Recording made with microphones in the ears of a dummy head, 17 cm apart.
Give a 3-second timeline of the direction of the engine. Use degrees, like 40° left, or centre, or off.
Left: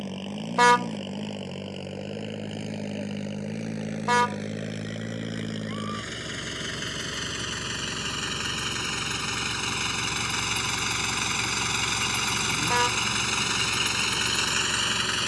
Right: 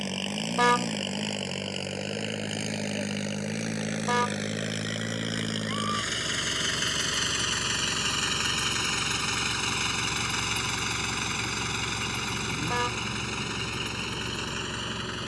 40° right, 30° right, 20° right, 10° left, 40° left.